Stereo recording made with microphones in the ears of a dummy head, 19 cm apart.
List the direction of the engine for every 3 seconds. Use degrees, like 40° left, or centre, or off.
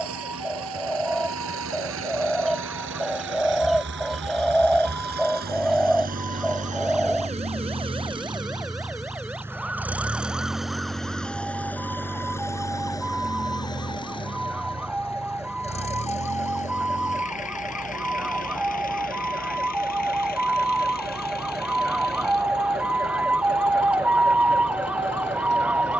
70° right, 50° right, 30° right, centre, 20° left, 30° left, 40° left, 50° left, 50° left.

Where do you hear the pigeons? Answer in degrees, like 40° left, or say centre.
centre.